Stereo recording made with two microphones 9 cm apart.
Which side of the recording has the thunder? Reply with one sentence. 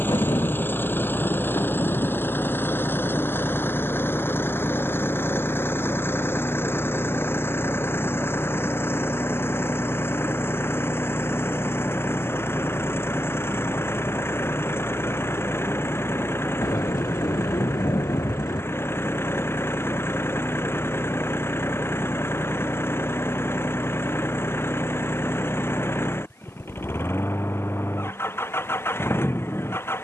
In this clip you hear the thunder on the left.